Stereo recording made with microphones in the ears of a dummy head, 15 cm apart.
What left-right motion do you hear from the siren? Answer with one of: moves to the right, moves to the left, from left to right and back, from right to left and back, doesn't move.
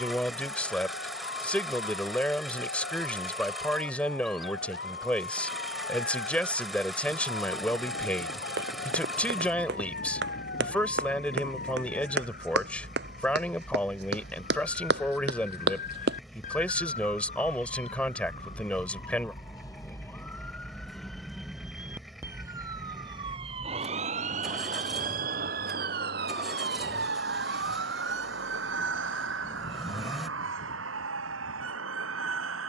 moves to the right.